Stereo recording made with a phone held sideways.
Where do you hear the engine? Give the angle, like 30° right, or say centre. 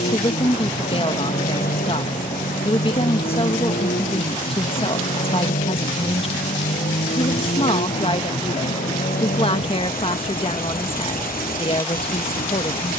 80° left.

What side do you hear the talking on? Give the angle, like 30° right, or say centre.
40° left.